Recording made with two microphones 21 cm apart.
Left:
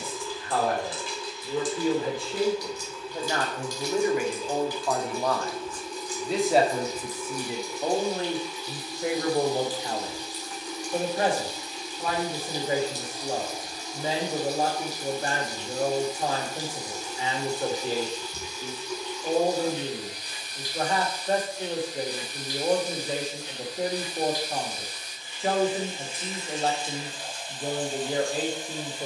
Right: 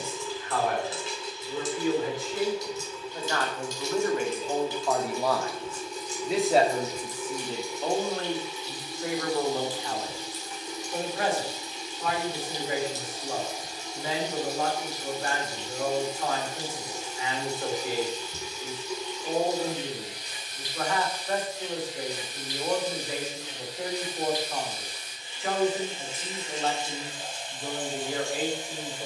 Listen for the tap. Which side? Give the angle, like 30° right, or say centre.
20° right.